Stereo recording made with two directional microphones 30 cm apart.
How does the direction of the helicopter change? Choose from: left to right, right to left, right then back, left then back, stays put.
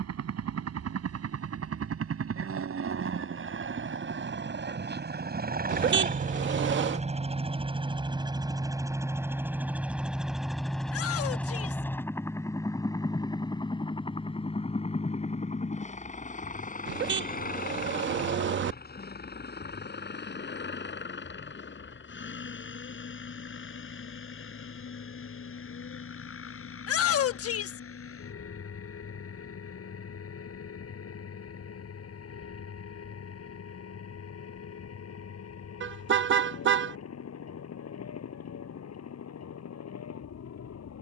right to left.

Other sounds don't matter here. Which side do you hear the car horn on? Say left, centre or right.
right.